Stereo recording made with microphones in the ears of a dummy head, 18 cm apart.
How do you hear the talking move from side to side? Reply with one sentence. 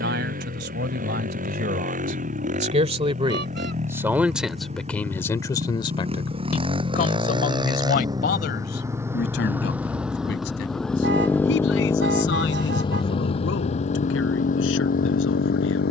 You can hear the talking go from the right side to the left.